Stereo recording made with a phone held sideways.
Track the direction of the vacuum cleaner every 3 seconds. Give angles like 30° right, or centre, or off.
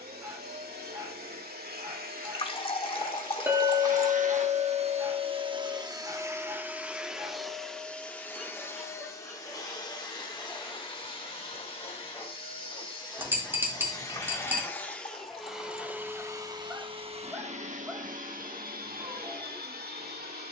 70° right, 40° right, centre, 30° left, 30° left, 20° right, 70° right.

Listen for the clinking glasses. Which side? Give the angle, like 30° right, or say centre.
10° right.